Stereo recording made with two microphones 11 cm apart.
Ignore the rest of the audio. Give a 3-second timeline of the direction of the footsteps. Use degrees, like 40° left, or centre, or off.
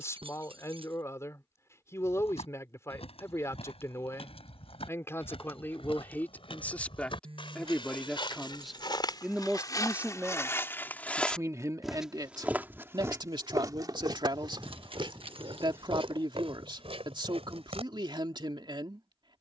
70° left, 70° left, 50° left, 30° left, 30° right, 60° right, off.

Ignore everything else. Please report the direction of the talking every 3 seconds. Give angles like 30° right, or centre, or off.
30° left, 20° left, 10° left, 20° right, 40° right, 50° right, 50° right.